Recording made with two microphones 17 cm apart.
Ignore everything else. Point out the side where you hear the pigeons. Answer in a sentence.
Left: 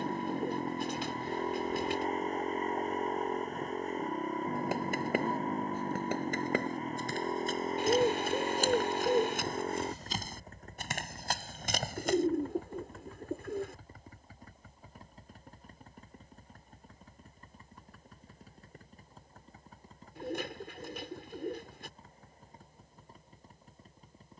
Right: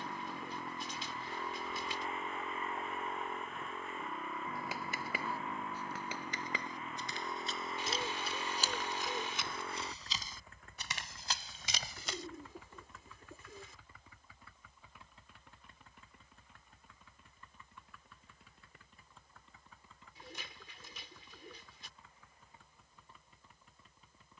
You can hear the pigeons on the left.